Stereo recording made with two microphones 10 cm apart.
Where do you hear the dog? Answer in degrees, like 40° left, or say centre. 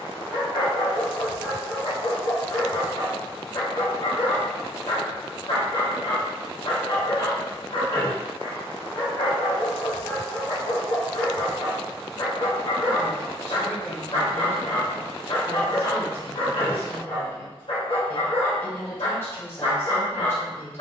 60° left.